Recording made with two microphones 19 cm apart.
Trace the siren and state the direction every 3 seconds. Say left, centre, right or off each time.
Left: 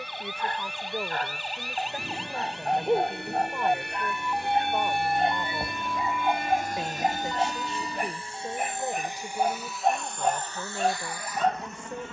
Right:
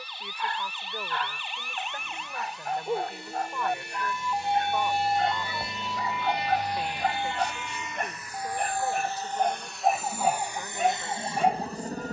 left, centre, right, right.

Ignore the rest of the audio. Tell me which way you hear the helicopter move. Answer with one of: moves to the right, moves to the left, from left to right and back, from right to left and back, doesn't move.
moves to the right.